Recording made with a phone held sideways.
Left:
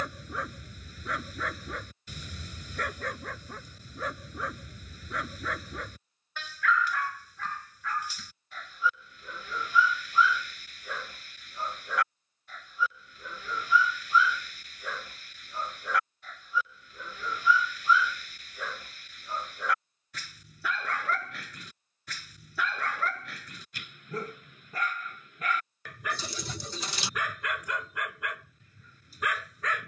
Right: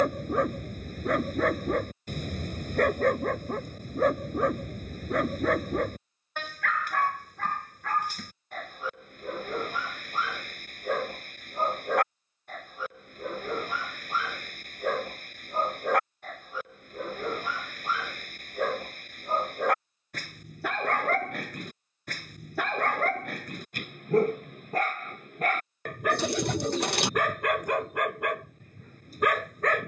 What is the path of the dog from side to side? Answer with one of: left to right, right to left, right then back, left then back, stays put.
stays put.